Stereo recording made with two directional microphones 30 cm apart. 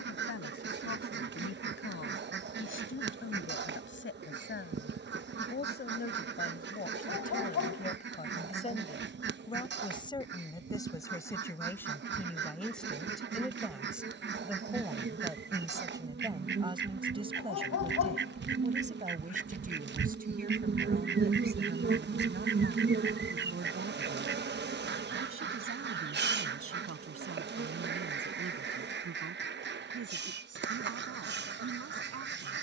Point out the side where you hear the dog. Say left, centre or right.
left.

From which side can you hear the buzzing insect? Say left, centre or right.
right.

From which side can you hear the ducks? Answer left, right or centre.
right.